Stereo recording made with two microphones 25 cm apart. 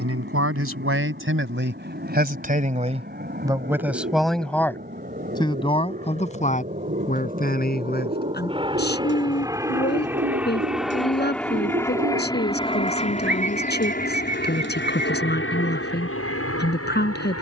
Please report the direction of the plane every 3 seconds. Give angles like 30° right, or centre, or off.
50° right, 40° right, 30° right, centre, 30° left, 50° left.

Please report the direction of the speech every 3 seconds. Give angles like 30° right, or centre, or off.
50° right, centre, 40° left, 40° left, 40° left, 40° left.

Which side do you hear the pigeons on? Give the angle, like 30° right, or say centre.
50° right.